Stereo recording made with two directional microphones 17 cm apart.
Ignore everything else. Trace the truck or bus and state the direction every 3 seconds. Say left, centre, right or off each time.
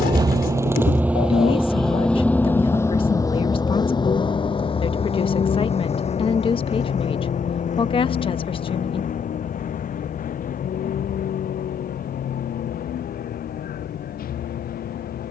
centre, left, left, left, left.